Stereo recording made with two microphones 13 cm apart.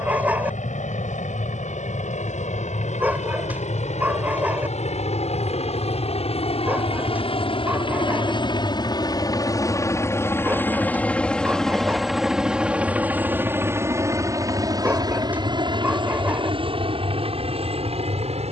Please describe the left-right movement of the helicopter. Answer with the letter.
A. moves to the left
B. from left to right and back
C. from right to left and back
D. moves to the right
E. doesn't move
D.